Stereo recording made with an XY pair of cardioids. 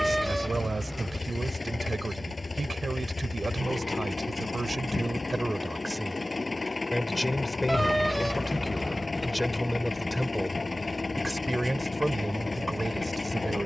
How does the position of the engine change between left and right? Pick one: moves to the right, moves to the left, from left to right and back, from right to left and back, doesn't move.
doesn't move.